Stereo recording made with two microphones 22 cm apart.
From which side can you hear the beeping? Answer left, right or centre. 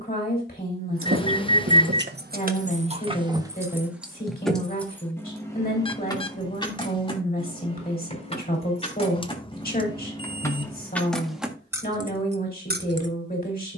left.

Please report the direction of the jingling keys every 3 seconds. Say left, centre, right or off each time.
right, centre, left, centre, right.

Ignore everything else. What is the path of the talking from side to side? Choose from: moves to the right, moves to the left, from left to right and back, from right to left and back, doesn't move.
doesn't move.